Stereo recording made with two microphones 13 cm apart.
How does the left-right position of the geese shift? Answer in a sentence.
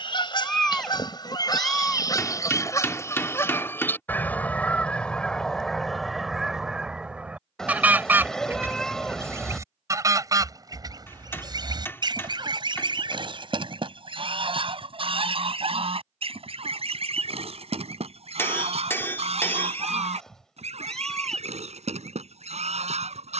In this clip you hear the geese move to the right.